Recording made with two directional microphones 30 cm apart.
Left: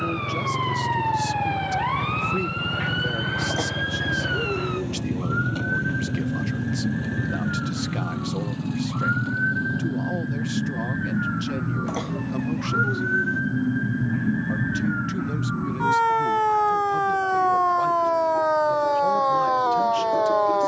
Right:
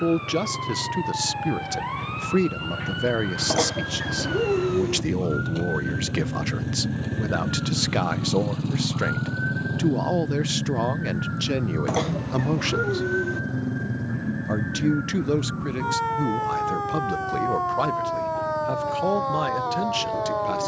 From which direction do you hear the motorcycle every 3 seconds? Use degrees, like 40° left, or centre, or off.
50° left, 20° left, 10° right, 40° right, 50° right, 60° right, 70° right.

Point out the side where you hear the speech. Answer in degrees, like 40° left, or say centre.
50° right.